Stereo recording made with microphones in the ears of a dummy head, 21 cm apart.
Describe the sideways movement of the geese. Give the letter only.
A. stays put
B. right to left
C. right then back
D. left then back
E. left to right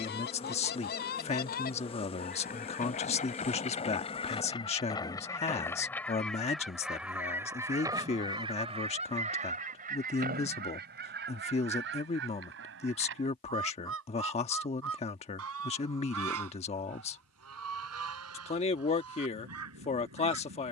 E.